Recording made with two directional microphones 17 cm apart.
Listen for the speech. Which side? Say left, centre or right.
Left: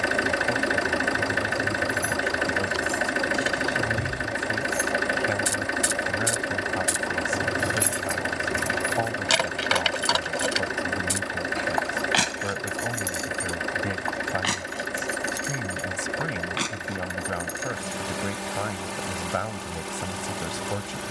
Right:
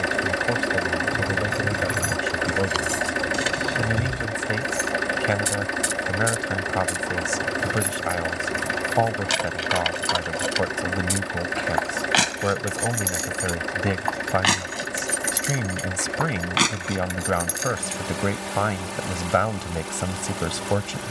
right.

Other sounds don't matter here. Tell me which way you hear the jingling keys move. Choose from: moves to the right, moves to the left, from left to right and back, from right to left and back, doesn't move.
from right to left and back.